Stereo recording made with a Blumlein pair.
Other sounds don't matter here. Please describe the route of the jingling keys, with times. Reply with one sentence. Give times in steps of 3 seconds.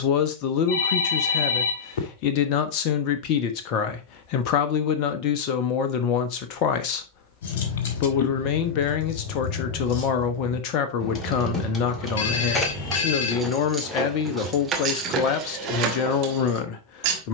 In this clip you hear the jingling keys not at all from 0 s, on the left from 6 s, in the centre from 12 s and on the right from 15 s.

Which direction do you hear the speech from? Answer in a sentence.
In this clip you hear the speech on the left.